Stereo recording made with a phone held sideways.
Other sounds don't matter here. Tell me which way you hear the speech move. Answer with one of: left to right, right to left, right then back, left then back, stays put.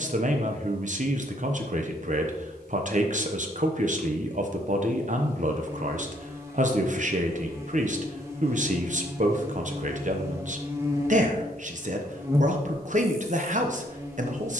stays put.